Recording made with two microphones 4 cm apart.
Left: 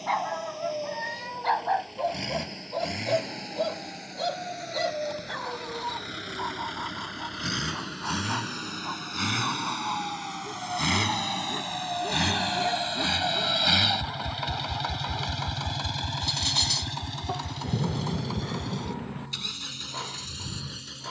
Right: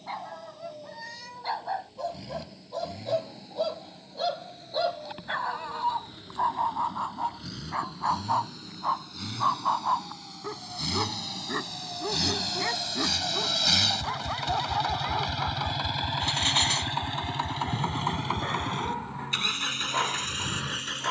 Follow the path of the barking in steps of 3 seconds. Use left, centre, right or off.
left, centre, right, right, right, right, right.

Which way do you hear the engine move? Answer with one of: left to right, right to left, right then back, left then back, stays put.
left to right.